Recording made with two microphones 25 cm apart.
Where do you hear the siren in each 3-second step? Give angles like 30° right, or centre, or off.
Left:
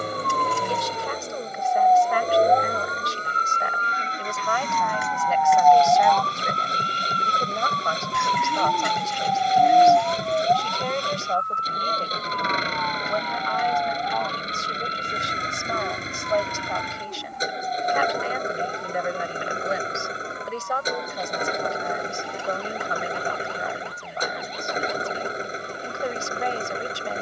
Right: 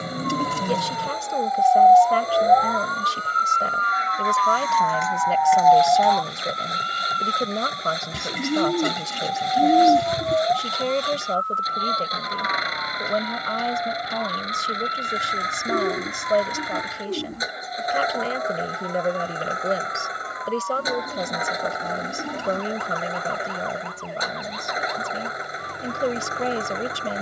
40° left, 10° left, 10° right, 30° right, 40° right, 50° right, 50° right, 50° right, 60° right.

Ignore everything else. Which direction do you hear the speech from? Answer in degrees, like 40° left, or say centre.
40° right.